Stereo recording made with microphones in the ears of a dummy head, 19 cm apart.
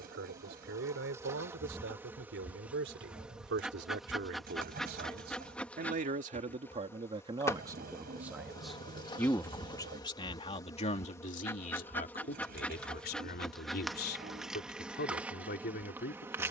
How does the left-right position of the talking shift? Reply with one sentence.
In this clip you hear the talking move to the left.